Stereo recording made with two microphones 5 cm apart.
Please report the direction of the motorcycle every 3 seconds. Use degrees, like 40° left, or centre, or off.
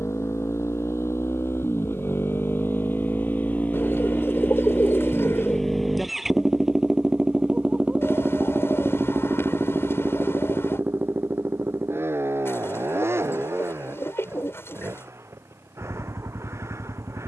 50° left, 20° left, 20° right, 40° right, 50° right, 60° right.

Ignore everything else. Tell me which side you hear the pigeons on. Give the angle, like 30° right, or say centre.
50° left.